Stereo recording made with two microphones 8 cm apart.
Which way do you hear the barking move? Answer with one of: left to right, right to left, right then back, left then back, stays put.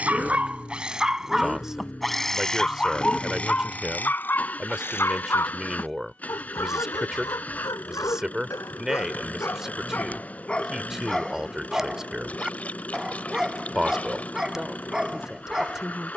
left then back.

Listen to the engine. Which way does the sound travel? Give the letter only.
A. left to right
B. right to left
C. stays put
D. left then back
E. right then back
C.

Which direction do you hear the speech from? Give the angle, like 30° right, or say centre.
10° right.